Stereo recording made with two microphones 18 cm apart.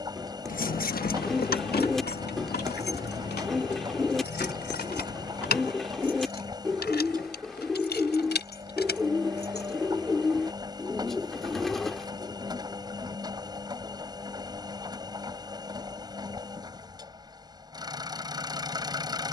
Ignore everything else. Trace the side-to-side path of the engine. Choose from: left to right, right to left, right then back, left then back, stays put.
stays put.